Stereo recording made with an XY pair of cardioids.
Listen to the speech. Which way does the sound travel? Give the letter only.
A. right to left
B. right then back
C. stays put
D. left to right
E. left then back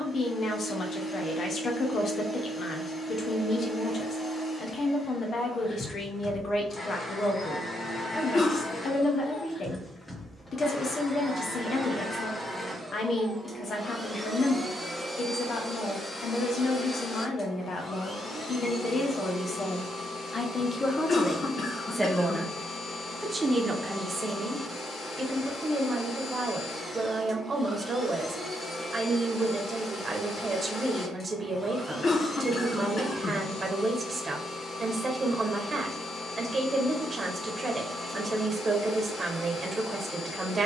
D.